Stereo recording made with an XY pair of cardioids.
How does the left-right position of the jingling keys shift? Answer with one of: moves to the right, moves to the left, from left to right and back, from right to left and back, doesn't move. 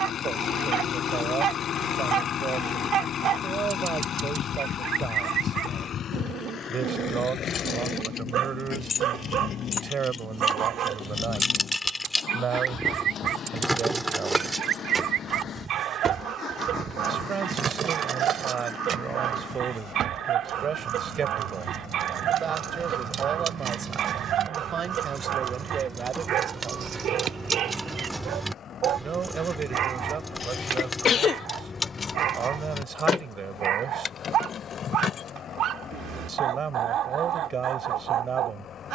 from left to right and back.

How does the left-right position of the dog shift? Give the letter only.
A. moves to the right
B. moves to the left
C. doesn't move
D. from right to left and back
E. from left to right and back
C.